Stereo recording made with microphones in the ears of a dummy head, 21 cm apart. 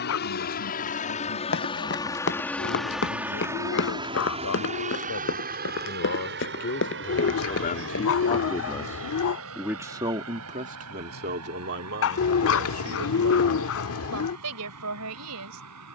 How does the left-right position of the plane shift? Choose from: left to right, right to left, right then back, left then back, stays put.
left to right.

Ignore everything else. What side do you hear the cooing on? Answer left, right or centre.
left.